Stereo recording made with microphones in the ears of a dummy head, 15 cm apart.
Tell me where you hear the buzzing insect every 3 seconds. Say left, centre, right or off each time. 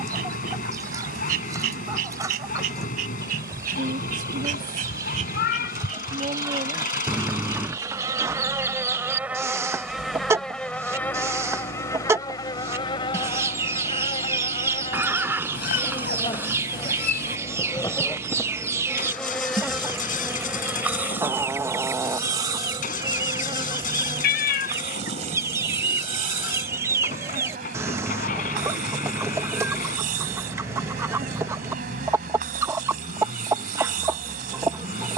right, right, right, centre, left, left, centre, right, right, right, right, right.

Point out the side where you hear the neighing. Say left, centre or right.
centre.